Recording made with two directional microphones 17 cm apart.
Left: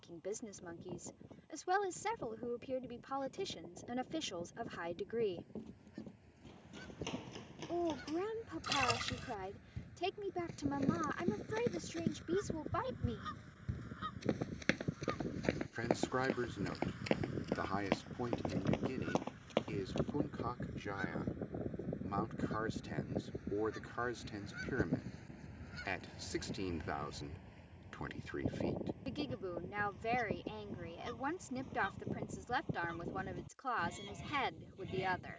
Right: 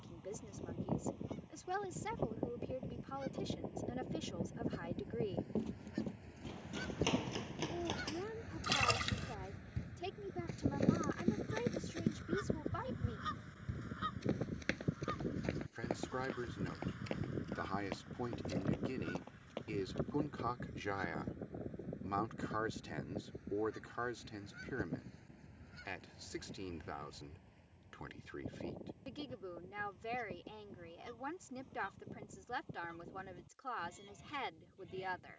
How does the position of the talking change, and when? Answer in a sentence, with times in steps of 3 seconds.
In this clip you hear the talking on the left from 0 s, in the centre from 18 s and on the left from 24 s.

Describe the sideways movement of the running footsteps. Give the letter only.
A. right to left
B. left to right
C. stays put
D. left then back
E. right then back
A.